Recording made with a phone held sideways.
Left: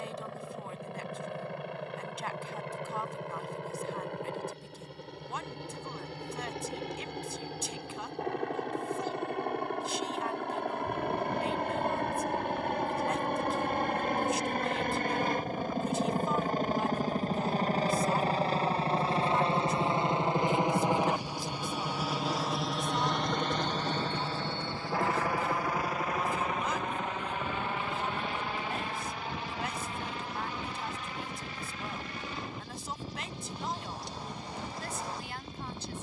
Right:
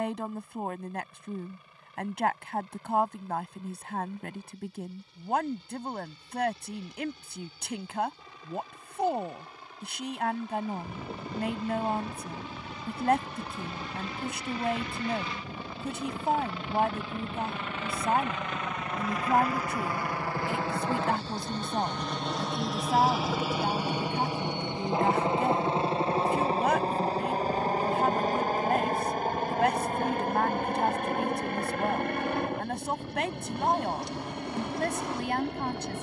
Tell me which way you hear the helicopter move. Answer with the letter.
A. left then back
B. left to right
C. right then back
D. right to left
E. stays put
B.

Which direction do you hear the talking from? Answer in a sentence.
In this clip you hear the talking on the right.